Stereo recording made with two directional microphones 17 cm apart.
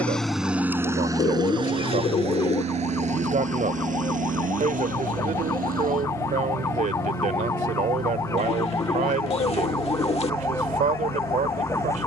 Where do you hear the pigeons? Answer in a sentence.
You can hear the pigeons on the left.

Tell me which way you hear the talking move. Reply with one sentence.
You can hear the talking stay in one place.